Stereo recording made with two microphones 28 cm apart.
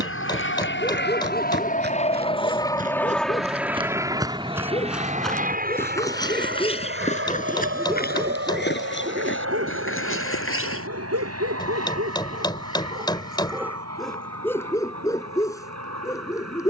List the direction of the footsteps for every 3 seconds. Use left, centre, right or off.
right, centre, left, left, off, off.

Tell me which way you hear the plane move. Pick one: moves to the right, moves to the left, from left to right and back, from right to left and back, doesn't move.
moves to the right.